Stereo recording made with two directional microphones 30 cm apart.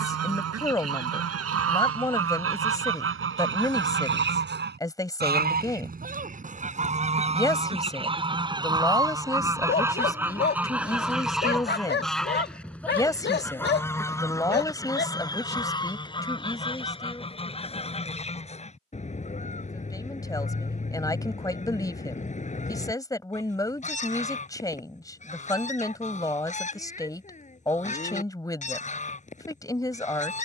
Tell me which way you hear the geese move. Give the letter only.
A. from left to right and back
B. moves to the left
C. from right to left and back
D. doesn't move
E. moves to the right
B.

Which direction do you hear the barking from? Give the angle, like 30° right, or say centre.
30° left.